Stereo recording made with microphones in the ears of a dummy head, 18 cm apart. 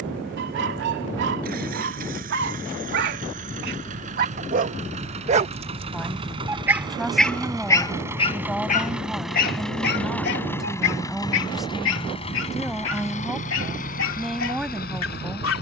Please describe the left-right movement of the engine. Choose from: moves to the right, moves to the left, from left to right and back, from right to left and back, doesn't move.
moves to the left.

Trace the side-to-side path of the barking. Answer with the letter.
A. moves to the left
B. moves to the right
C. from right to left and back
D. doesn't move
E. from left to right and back
A.